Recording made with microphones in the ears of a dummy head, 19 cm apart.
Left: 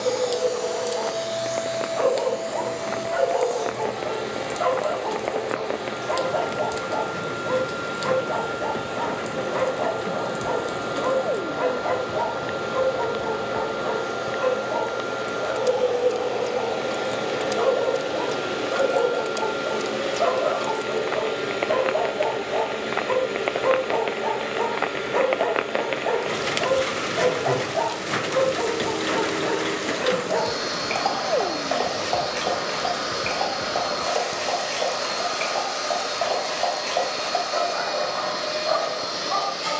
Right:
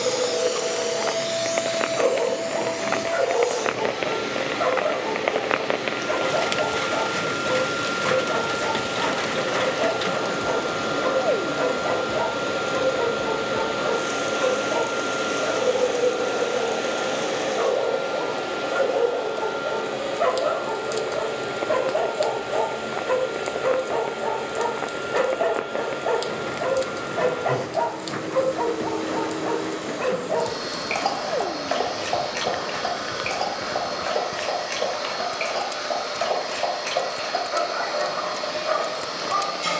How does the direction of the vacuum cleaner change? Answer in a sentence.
You can hear the vacuum cleaner move to the left.